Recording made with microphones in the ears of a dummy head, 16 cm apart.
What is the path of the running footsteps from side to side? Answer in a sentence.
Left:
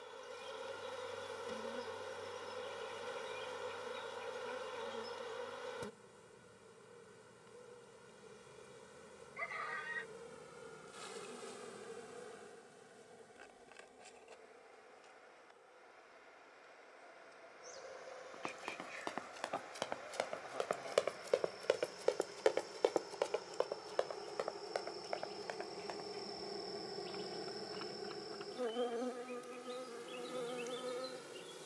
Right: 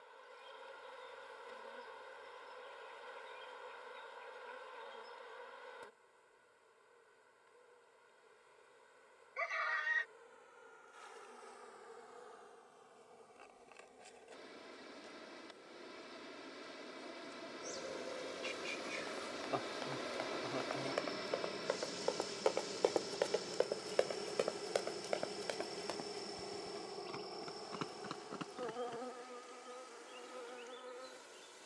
You can hear the running footsteps go from the left side to the right.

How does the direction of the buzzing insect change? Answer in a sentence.
In this clip you hear the buzzing insect move from left to right and back again.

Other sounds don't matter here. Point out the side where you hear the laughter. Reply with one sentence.
In this clip you hear the laughter on the right.